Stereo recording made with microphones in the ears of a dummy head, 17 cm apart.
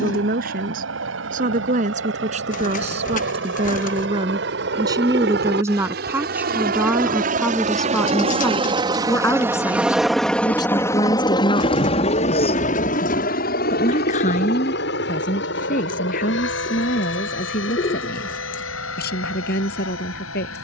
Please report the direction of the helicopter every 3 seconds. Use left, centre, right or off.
right, right, right, centre, left, left, left.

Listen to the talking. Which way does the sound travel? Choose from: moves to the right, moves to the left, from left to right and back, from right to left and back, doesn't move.
moves to the left.